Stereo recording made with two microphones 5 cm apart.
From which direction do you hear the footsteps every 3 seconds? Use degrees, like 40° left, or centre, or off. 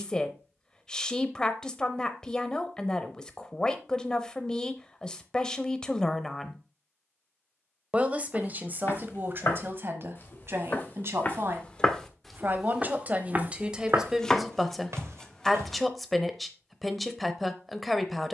off, off, 60° left, 40° left, 30° right, 70° right.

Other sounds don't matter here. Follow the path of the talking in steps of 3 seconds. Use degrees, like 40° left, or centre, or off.
20° left, 20° left, 20° right, 50° right, 20° right, centre.